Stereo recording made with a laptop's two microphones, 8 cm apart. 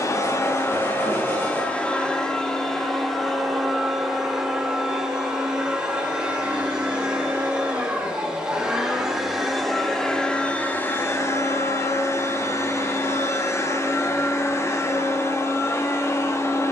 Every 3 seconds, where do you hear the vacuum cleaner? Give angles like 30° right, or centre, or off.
20° left, 10° right, 10° right, 20° left, 40° left, 40° left.